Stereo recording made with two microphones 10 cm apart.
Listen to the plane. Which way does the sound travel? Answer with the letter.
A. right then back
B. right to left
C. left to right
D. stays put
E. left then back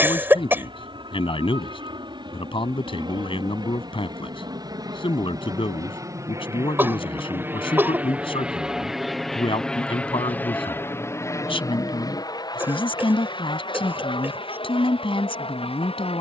B.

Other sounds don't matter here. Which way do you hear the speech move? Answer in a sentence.
You can hear the speech stay put.